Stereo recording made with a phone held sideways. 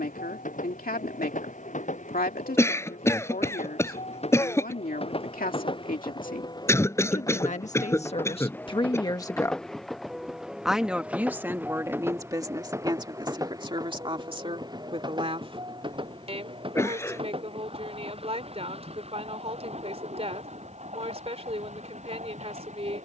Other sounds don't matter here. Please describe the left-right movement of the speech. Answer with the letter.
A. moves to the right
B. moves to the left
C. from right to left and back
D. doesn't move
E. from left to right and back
A.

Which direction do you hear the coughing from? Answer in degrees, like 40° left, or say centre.
20° left.